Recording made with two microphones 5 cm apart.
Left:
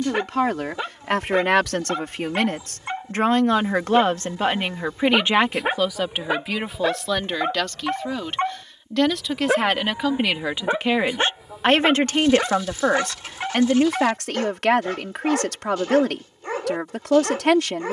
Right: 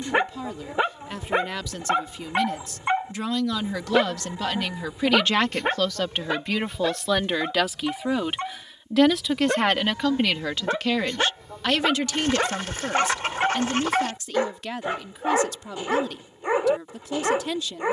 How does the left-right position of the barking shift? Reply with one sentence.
In this clip you hear the barking go left and come back.